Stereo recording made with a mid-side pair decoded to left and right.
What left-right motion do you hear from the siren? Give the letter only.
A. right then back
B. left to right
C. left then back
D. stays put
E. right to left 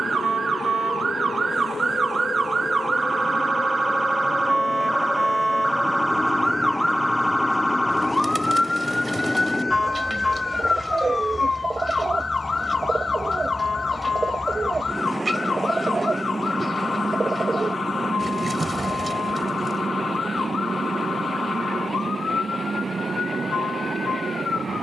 E.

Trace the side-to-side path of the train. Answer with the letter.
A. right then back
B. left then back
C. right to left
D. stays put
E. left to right
E.